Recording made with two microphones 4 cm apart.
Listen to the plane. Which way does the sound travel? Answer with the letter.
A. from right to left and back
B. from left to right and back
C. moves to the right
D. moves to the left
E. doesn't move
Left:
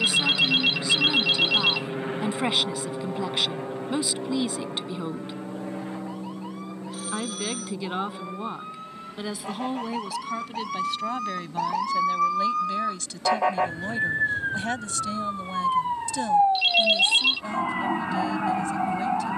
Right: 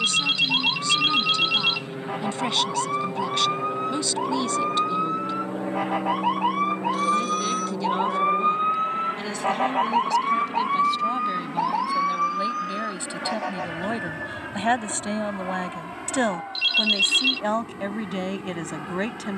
C.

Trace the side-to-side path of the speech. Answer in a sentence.
You can hear the speech go from the left side to the right.